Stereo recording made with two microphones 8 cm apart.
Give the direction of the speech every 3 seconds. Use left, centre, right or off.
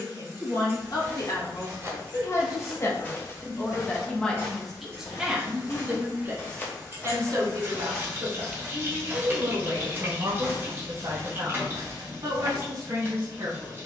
left, centre, right, right, right.